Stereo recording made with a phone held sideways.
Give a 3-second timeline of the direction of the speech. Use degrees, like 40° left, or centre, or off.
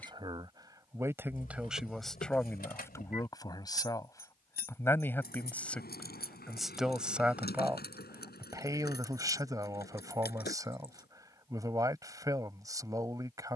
10° right, 20° left, 10° right, 20° right, 20° right.